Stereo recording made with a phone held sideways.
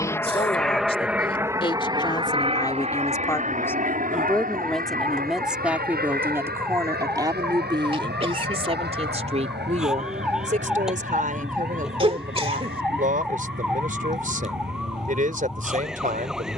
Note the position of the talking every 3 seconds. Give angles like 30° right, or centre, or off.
30° left, 10° left, 30° right, 50° right, 50° right, 50° right.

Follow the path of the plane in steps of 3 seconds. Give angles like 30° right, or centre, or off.
10° right, 50° right, 70° right, 70° right, 80° right, 80° right.